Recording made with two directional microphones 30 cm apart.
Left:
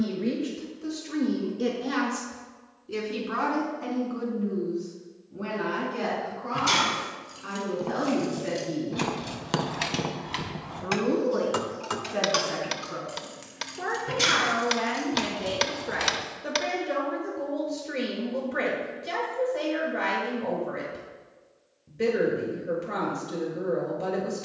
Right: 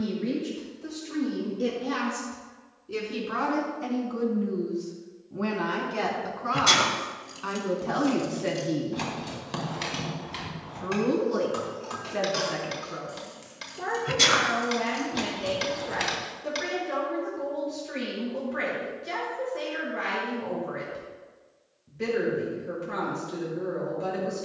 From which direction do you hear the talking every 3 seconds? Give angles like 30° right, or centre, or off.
30° left, 20° right, 50° right, 10° right, 10° left, 30° left, 30° left, 30° left.